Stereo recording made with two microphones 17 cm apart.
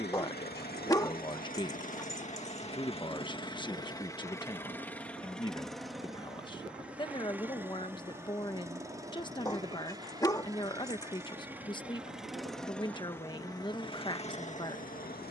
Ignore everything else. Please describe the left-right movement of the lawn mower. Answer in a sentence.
In this clip you hear the lawn mower move from left to right and back again.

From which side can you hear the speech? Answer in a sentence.
You can hear the speech on the left.